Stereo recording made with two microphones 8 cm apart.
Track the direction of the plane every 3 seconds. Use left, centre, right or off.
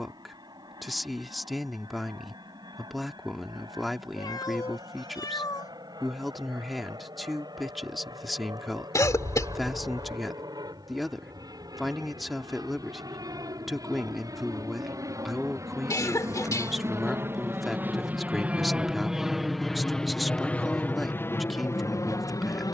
right, right, right, right, right, right, centre, left.